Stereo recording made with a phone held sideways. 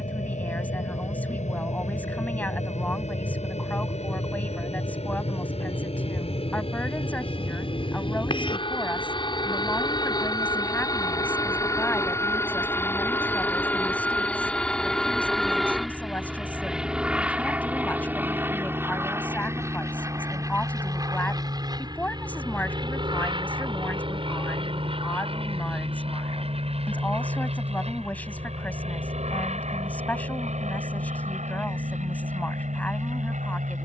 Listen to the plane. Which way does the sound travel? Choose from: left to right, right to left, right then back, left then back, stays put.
left to right.